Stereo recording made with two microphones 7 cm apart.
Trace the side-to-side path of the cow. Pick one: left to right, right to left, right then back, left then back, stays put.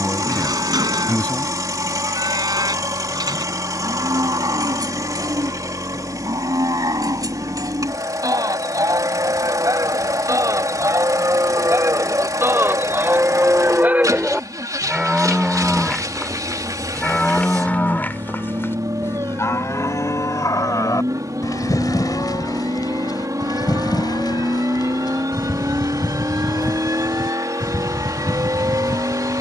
right to left.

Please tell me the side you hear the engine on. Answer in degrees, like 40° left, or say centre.
50° right.